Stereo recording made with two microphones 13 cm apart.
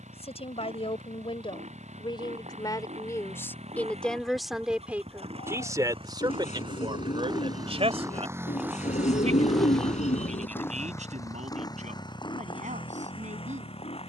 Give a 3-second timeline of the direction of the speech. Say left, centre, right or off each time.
left, centre, right, right, right.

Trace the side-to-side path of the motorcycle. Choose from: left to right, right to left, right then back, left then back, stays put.
right to left.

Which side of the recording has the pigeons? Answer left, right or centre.
left.